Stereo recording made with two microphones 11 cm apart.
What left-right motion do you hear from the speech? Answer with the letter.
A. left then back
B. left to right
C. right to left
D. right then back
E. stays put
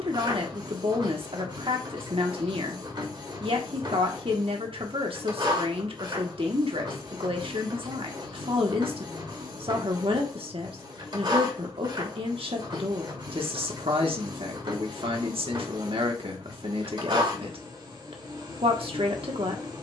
E.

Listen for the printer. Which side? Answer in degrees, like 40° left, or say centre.
50° right.